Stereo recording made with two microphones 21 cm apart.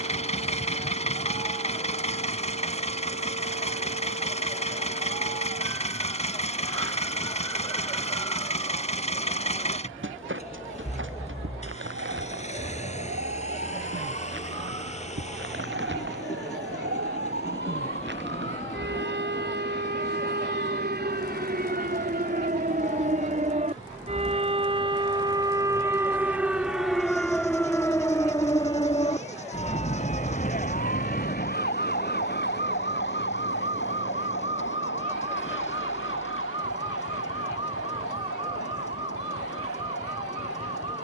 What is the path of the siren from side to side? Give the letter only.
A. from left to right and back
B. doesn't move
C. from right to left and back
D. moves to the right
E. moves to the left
E.